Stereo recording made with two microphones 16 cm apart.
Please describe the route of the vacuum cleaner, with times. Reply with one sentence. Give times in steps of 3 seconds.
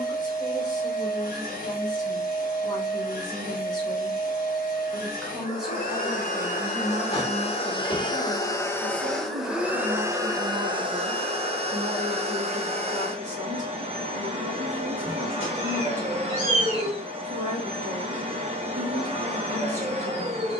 In this clip you hear the vacuum cleaner on the left from 0 s and on the right from 9 s.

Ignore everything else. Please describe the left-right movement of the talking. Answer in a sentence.
You can hear the talking go from the left side to the right.